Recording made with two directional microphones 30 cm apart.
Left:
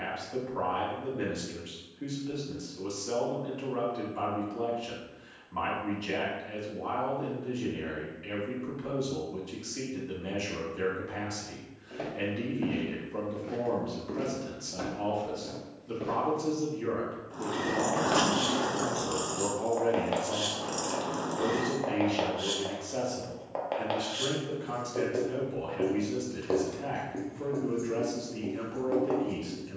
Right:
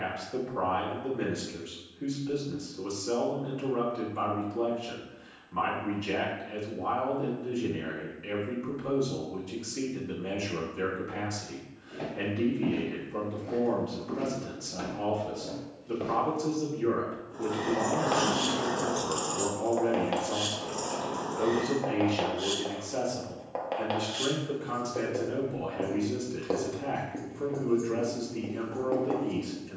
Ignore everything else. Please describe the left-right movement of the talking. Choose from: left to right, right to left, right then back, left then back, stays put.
stays put.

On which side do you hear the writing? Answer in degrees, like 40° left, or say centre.
centre.